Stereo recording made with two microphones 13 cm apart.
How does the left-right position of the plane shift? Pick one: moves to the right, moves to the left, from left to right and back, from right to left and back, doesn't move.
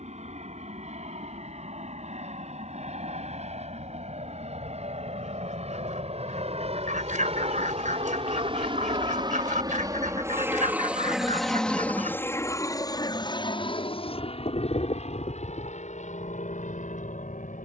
moves to the left.